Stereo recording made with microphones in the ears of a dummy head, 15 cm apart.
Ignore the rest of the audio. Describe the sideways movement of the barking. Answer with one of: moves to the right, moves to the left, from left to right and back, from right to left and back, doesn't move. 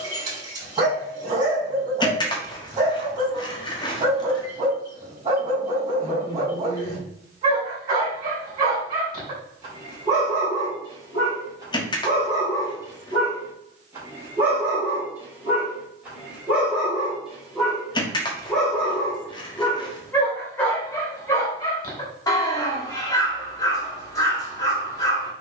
moves to the left.